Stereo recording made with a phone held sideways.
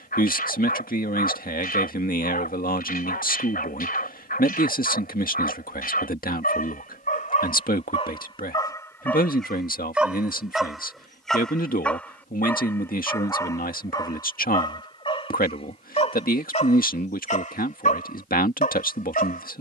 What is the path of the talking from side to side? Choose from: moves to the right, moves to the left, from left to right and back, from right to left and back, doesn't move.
doesn't move.